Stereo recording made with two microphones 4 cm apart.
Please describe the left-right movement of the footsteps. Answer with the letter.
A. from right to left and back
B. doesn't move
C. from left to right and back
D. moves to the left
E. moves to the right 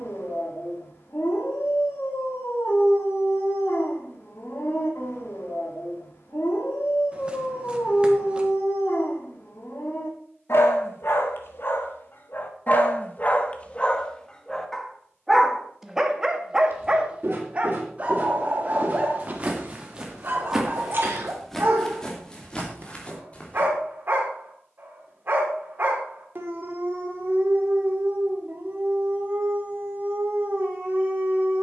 D.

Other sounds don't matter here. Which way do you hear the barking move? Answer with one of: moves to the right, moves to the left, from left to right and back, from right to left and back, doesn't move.
moves to the right.